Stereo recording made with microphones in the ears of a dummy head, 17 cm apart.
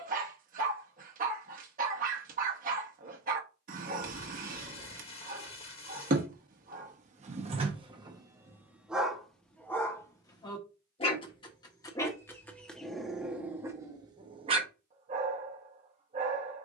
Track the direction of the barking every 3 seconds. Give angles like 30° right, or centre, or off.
50° right, 50° right, 30° right, 20° left, 10° right, 40° right.